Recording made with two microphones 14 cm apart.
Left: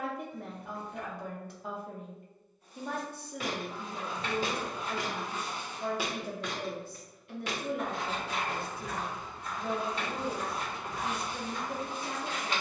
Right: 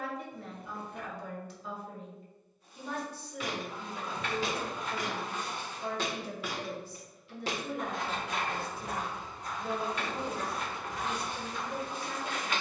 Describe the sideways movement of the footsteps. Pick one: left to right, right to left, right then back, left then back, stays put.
right then back.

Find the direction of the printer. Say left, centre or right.
left.